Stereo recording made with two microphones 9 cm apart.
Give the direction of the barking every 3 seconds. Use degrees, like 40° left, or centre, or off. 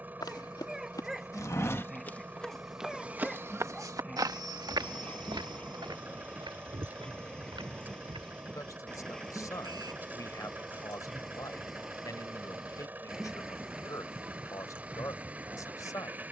centre, 10° left, 10° left, centre, 10° right, 20° right.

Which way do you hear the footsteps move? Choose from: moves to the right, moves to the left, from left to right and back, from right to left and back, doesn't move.
moves to the right.